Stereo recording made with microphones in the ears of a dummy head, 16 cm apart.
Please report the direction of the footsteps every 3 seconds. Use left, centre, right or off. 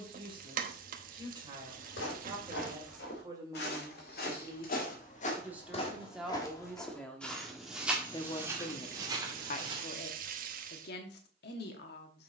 left, left, centre, right.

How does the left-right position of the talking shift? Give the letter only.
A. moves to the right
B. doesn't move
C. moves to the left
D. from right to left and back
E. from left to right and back
C.